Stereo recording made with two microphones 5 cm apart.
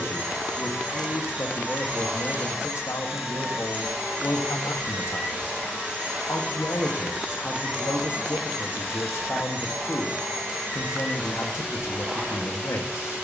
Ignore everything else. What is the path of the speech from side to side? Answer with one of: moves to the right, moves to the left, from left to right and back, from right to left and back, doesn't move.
doesn't move.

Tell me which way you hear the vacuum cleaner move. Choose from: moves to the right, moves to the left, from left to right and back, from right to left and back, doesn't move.
doesn't move.